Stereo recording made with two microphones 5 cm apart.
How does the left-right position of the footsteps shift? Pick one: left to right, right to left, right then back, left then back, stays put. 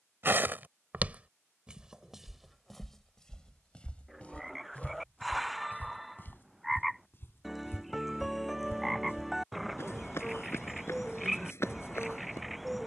right to left.